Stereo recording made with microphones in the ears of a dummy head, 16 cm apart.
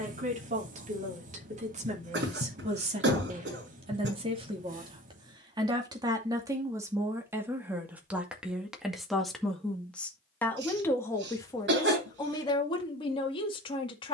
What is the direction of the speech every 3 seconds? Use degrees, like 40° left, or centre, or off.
40° right, 30° right, 10° right, 10° left, 30° left.